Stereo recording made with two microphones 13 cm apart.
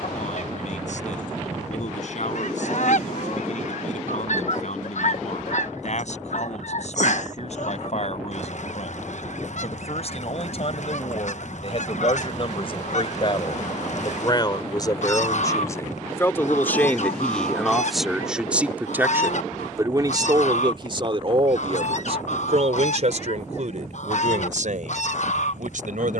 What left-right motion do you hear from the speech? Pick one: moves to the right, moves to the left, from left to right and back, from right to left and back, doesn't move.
moves to the right.